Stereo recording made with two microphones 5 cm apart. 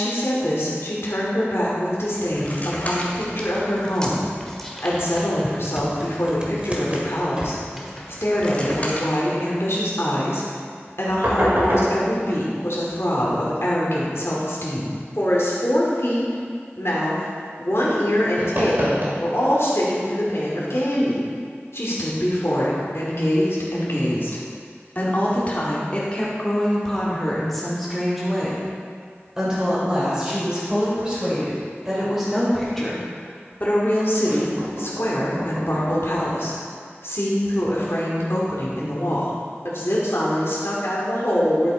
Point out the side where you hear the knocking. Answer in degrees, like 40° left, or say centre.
50° right.